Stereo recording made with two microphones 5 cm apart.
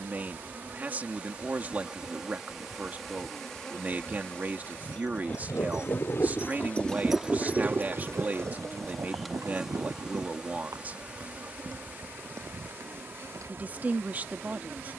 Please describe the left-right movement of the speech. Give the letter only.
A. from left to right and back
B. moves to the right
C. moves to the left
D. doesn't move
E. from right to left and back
D.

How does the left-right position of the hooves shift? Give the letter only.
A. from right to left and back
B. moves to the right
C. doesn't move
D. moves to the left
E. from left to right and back
B.